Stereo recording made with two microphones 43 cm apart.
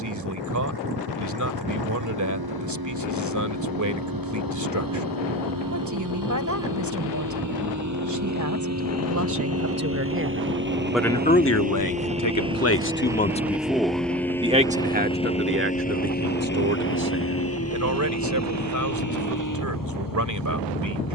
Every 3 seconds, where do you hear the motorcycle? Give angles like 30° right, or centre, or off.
60° right, 50° right, 40° right, 30° right, centre, 20° left, 40° left.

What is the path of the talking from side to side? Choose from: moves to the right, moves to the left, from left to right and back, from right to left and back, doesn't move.
from right to left and back.